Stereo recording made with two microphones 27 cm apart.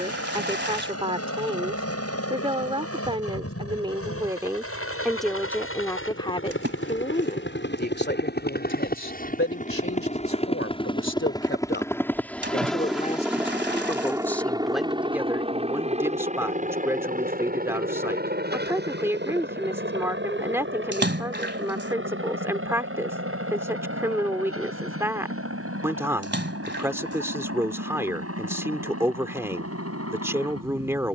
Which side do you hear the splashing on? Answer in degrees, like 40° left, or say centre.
40° right.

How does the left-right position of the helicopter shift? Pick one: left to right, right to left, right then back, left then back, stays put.
left to right.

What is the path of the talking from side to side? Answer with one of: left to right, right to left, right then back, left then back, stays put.
left then back.